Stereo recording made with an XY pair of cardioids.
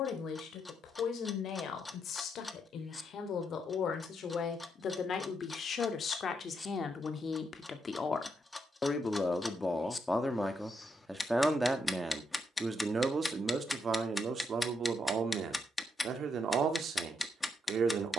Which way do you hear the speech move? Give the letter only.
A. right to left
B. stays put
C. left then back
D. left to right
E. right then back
D.